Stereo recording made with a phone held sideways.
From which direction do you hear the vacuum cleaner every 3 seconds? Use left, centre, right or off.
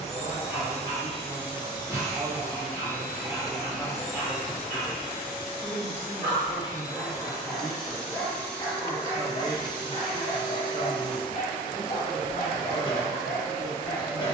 left, centre, centre, left, left.